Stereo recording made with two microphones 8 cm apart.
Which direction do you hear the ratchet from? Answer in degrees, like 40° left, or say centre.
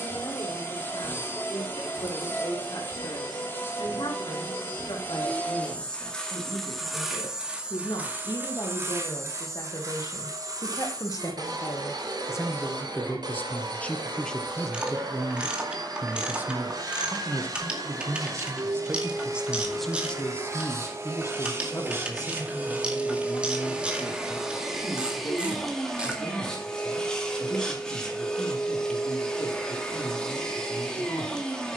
10° right.